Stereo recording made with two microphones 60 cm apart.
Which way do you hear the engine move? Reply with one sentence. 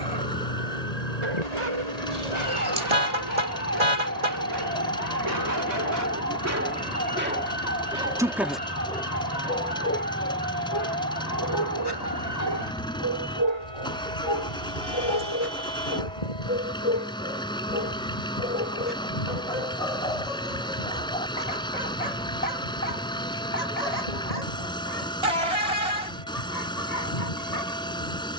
In this clip you hear the engine stay put.